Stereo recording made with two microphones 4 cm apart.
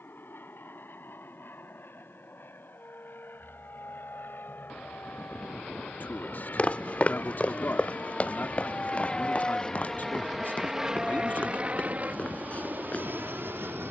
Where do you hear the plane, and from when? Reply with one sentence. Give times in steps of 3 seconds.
You can hear the plane on the left from 0 s, in the centre from 9 s and on the right from 12 s.